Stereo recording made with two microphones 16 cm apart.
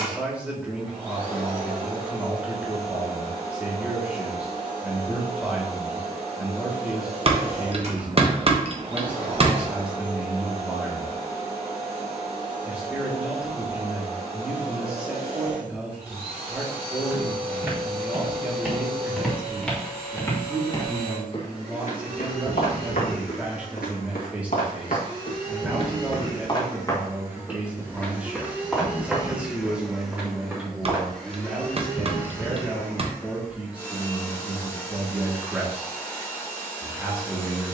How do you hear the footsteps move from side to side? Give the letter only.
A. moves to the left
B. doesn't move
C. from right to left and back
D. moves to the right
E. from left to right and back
C.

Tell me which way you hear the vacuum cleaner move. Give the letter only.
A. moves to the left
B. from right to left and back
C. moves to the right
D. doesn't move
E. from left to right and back
A.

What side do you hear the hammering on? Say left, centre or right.
right.